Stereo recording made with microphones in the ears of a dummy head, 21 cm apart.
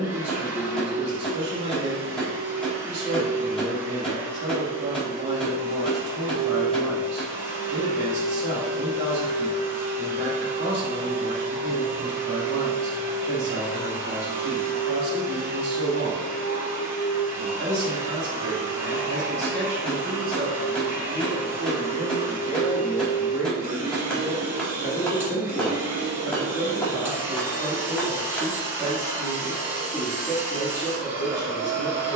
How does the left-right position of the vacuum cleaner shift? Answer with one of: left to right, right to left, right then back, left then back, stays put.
stays put.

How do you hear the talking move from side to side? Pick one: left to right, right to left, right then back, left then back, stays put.
right to left.